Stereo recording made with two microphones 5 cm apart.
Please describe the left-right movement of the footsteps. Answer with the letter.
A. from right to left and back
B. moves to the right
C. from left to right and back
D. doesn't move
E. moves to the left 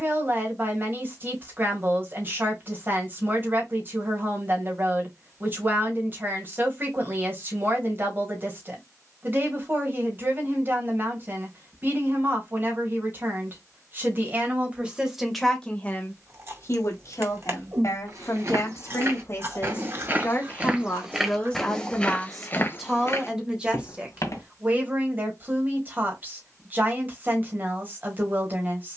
E.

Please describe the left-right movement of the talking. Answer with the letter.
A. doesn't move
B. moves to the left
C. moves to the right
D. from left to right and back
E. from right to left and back
E.